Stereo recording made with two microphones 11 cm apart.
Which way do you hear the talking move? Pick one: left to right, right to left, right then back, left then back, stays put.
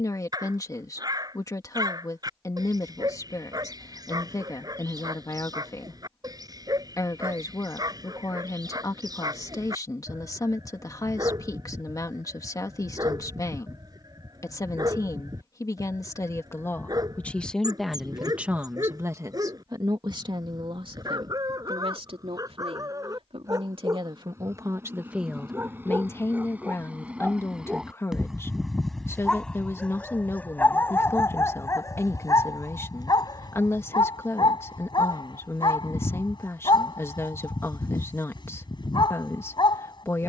right then back.